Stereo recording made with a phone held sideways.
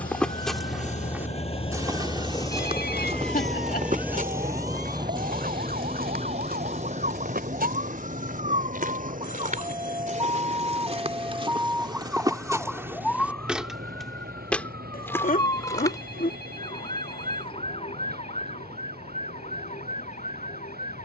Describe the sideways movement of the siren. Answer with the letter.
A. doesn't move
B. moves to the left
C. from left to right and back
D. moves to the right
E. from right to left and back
B.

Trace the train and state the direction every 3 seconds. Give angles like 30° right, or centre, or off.
40° left, 20° right, 50° right, 60° right, 60° right, 70° right, 70° right.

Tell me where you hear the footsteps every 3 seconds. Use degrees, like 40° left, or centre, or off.
20° right, 60° right, 70° right, 40° right, 10° right, 20° left, off.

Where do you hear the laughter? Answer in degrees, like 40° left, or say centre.
60° left.